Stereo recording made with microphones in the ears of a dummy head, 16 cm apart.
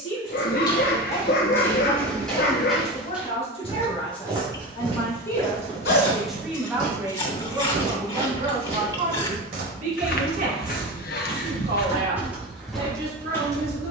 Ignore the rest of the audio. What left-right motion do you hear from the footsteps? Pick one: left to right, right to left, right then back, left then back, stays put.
right then back.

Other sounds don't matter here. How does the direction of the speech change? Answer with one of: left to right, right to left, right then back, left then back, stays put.
left to right.